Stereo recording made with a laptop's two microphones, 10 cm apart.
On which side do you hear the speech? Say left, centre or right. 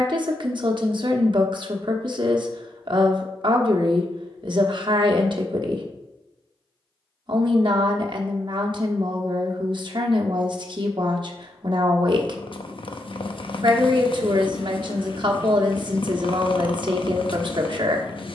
right.